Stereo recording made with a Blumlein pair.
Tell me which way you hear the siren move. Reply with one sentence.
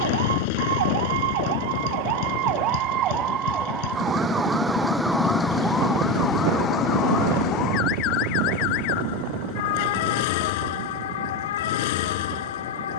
In this clip you hear the siren go from the right side to the left.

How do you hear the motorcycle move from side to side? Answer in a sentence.
In this clip you hear the motorcycle stay put.